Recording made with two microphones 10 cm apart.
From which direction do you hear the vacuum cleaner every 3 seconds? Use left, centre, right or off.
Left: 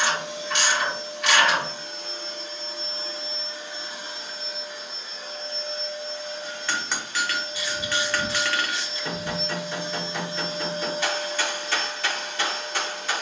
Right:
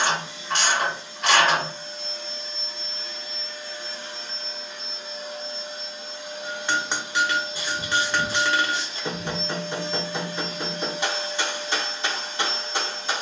left, centre, centre, left, left.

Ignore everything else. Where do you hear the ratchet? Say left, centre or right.
right.